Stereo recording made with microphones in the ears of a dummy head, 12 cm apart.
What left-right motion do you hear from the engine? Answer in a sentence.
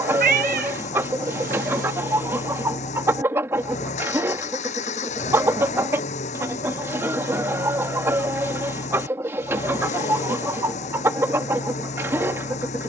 You can hear the engine stay put.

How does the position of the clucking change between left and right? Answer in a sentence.
You can hear the clucking stay in one place.